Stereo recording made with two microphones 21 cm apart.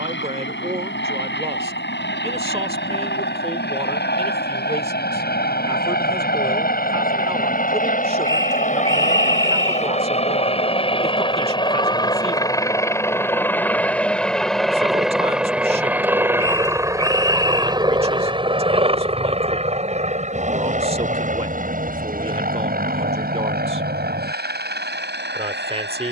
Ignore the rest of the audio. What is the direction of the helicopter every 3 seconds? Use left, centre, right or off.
left, left, left, left, centre, centre, right, right, right.